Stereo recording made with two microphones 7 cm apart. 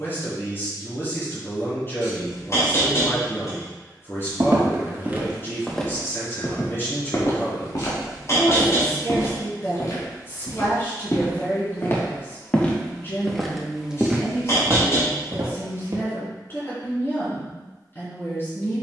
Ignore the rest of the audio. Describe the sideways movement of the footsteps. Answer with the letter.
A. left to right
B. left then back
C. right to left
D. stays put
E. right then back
B.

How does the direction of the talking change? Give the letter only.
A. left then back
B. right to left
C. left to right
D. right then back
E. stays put
E.